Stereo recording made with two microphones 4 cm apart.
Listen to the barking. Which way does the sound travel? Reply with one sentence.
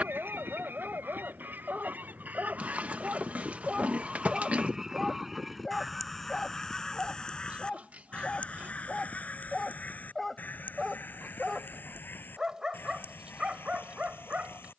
You can hear the barking move from right to left and back again.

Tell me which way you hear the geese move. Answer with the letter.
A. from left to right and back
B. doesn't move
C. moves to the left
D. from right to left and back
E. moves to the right
C.